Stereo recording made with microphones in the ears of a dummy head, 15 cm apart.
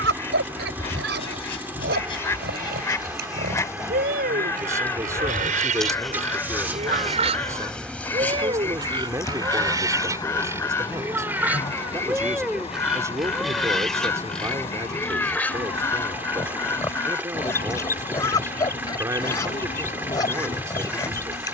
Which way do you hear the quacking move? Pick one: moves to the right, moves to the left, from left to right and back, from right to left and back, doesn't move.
doesn't move.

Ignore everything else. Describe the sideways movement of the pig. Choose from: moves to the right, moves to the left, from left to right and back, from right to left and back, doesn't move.
moves to the left.